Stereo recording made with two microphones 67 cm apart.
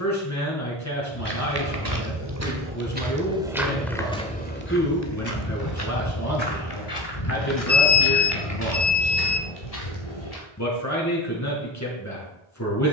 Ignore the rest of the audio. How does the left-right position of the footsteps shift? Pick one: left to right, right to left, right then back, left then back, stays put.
right to left.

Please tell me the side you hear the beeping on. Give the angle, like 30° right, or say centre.
60° left.